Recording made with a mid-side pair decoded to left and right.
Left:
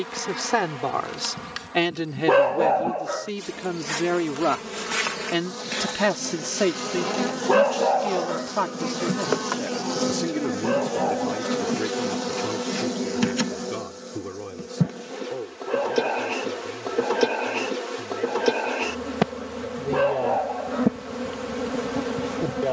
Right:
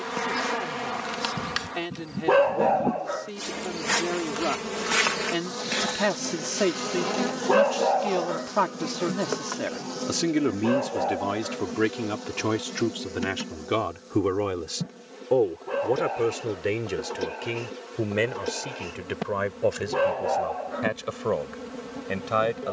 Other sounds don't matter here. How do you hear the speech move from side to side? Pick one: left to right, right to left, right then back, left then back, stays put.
left to right.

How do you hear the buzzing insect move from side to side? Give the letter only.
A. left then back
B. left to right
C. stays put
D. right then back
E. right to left
E.